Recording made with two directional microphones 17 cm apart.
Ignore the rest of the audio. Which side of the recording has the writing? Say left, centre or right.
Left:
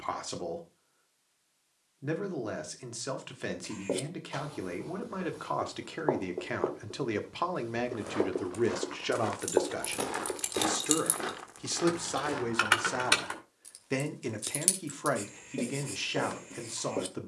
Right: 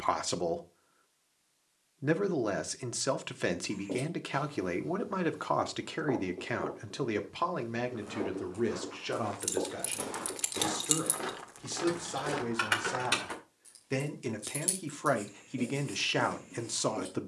left.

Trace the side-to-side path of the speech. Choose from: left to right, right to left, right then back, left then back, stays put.
left then back.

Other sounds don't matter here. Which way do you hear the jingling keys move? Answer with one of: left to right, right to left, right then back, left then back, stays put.
right to left.